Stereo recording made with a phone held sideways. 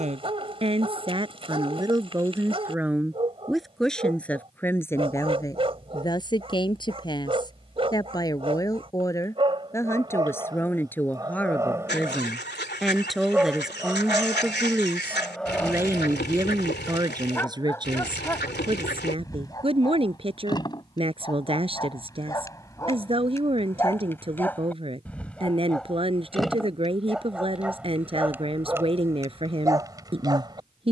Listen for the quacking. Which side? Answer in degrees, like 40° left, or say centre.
80° left.